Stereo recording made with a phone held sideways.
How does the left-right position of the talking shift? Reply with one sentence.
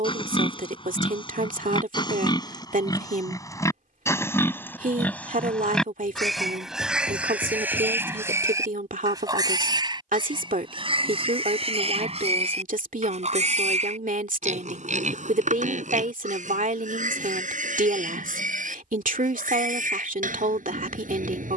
You can hear the talking stay in one place.